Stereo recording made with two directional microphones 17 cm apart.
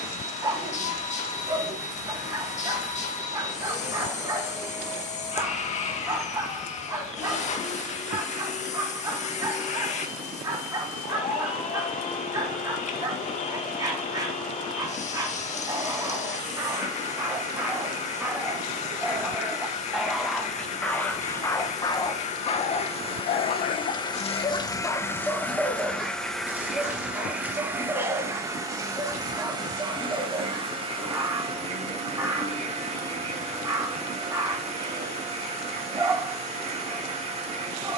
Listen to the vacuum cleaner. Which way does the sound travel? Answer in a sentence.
In this clip you hear the vacuum cleaner move to the right.